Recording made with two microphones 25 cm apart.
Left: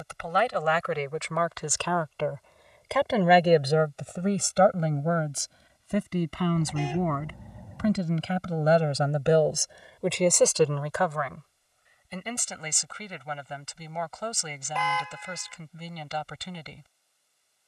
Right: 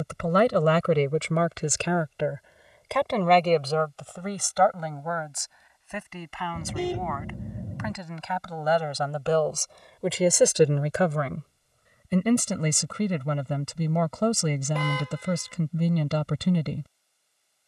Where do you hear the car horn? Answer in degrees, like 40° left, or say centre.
40° right.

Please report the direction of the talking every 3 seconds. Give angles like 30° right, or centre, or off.
30° right, 20° left, 40° left, 10° right, 60° right, 60° right.